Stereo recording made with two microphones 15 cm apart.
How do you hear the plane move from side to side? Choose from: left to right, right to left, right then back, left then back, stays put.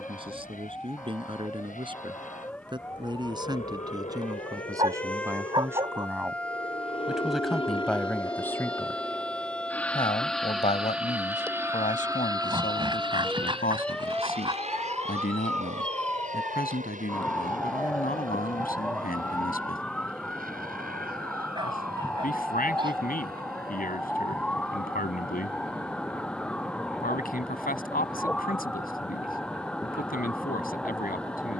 left to right.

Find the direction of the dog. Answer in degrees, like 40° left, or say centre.
30° right.